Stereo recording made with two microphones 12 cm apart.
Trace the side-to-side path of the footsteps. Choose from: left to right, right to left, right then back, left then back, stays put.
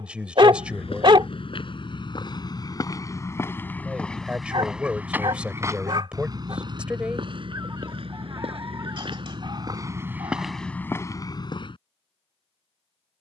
right then back.